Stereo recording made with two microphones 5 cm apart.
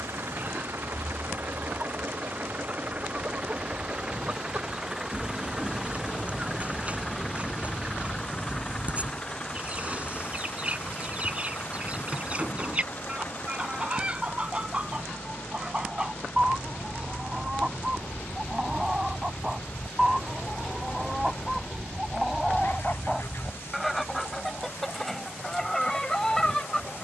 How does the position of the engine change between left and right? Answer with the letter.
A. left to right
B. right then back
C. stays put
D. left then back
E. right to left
E.